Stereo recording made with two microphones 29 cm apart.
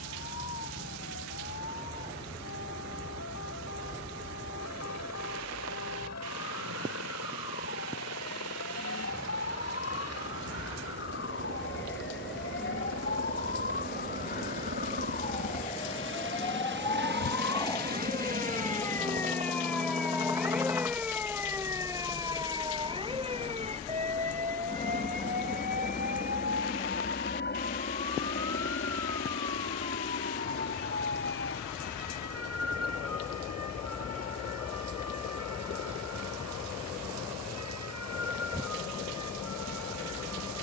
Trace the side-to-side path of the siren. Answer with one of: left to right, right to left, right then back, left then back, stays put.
left to right.